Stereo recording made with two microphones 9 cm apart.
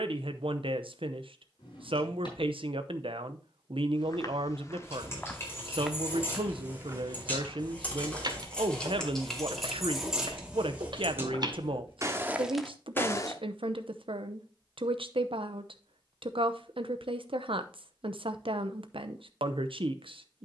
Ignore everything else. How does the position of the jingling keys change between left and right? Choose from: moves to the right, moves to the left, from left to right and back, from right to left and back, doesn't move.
moves to the right.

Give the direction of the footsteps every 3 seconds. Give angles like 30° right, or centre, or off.
off, 20° left, 40° right, 60° right, centre, off, off.